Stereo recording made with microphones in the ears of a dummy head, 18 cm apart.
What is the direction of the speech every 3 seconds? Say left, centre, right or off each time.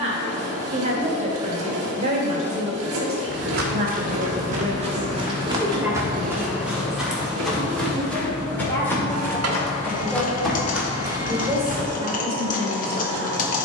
right, right, centre, centre, right.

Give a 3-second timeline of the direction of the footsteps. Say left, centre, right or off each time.
off, right, centre, centre, off.